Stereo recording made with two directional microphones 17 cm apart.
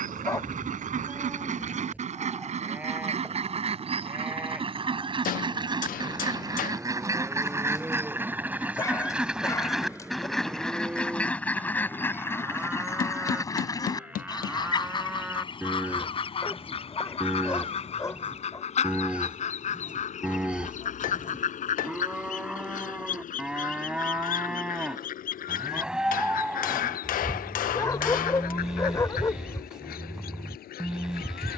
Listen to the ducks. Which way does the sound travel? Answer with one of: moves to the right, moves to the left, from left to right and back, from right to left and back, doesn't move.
moves to the left.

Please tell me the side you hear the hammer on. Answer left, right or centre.
left.